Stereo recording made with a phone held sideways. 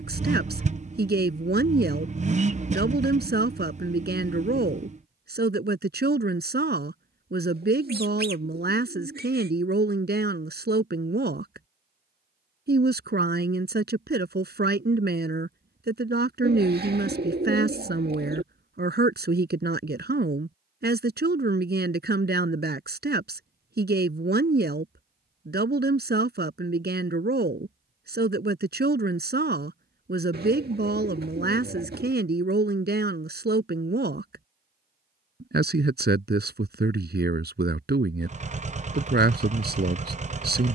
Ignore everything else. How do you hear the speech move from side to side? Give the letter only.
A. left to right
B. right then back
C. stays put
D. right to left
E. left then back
C.